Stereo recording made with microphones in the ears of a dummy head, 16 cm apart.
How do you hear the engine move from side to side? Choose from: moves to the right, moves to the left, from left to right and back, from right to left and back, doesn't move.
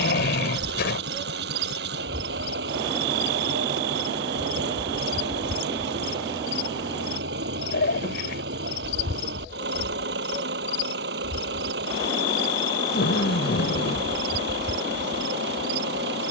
doesn't move.